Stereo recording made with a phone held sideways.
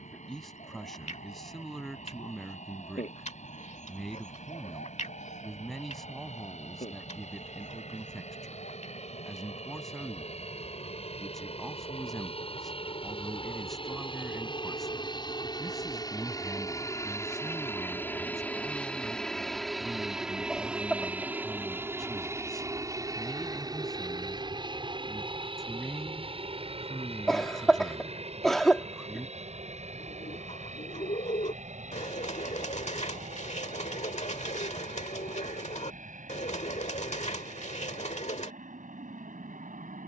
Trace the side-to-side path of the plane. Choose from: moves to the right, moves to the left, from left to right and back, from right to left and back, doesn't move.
moves to the right.